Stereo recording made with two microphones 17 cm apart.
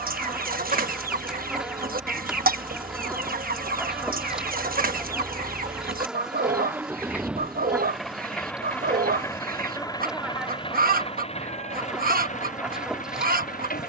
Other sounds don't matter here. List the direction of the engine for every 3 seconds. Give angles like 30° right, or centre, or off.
40° right, 30° right, centre, 30° left, 50° left.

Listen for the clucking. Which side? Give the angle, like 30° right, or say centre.
60° right.